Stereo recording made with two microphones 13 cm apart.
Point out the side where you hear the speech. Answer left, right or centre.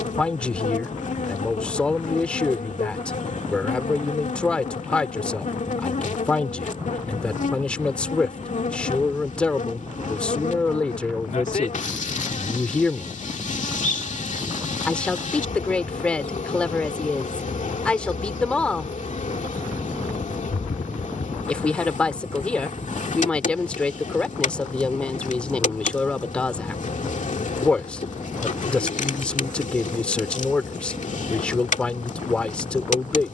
centre.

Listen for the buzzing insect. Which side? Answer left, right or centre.
left.